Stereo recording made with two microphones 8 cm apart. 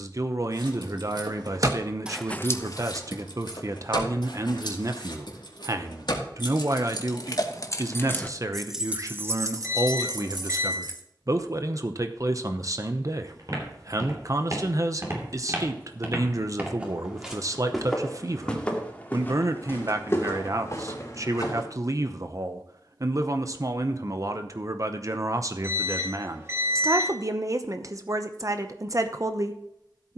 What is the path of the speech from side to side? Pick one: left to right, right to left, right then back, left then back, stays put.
stays put.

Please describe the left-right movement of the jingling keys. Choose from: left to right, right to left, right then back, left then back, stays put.
left then back.